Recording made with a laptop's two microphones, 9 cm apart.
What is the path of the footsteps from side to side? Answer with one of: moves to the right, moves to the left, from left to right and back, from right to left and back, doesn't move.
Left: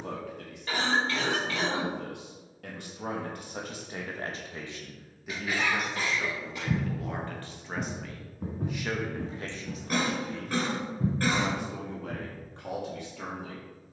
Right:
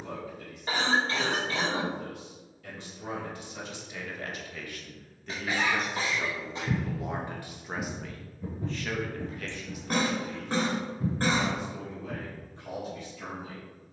from right to left and back.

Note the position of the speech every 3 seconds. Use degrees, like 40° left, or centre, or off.
70° left, 30° left, 10° right, 40° left, 70° left.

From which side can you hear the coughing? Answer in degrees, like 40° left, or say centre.
30° right.